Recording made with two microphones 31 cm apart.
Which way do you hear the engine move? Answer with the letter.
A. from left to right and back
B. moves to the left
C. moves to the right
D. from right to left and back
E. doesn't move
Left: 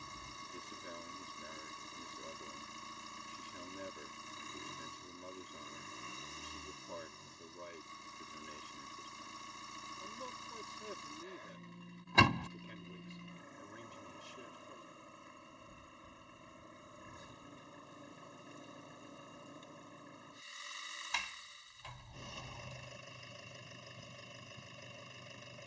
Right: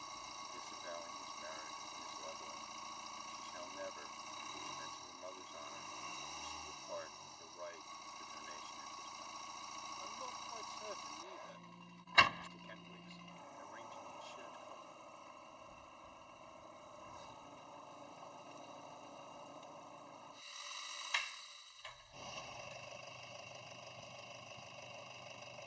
E.